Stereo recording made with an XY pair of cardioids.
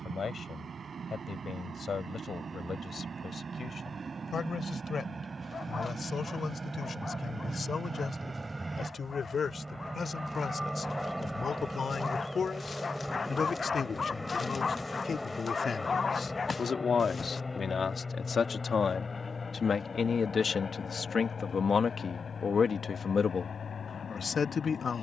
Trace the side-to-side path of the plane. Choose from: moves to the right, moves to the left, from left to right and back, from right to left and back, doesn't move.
moves to the left.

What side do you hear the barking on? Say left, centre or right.
left.